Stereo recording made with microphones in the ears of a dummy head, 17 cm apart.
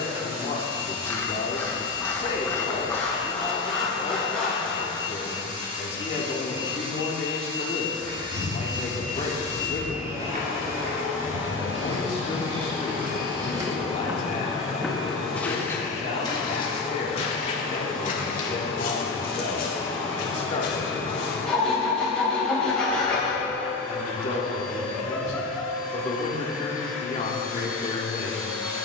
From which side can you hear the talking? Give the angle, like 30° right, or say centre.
40° left.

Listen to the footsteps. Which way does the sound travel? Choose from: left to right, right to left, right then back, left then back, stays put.
right to left.